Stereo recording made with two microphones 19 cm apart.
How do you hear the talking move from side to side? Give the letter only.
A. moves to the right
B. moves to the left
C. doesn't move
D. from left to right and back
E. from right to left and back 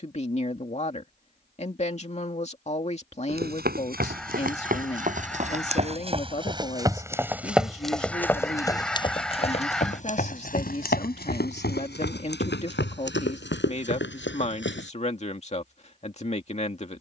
C.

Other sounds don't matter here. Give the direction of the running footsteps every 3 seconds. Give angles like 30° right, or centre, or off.
off, 50° right, 10° right, 50° left, 70° left, off.